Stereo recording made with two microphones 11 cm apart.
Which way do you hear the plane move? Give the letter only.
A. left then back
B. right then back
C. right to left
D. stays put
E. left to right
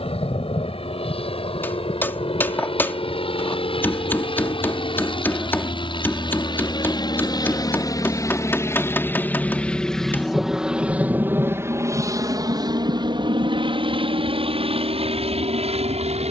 E.